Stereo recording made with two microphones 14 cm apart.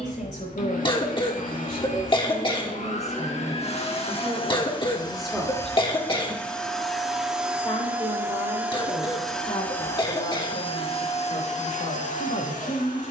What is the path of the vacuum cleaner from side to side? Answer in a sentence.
In this clip you hear the vacuum cleaner move from left to right and back again.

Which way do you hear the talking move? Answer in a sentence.
You can hear the talking go right and come back.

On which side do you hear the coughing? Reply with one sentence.
In this clip you hear the coughing on the left.